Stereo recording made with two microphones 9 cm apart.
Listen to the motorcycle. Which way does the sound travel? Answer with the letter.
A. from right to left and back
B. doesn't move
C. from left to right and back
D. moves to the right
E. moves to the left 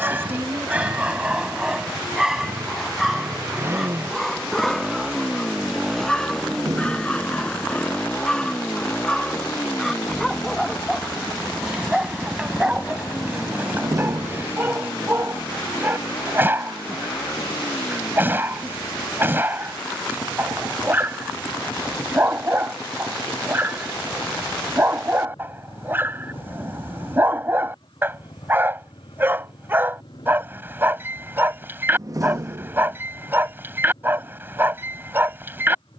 E.